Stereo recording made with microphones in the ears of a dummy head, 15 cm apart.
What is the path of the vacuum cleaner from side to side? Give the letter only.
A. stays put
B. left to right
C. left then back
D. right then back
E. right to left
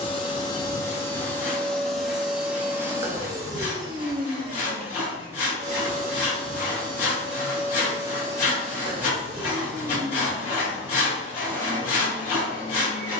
D.